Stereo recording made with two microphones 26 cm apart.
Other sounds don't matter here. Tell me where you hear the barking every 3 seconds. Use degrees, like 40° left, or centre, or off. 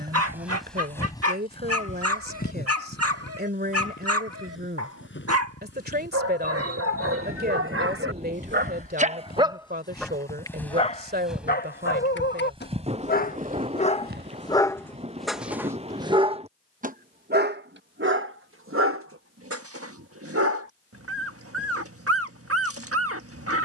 70° right, 70° right, 60° right, 10° left, 30° left, 20° right, 60° right, 60° right.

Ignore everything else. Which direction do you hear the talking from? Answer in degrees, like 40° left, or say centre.
40° right.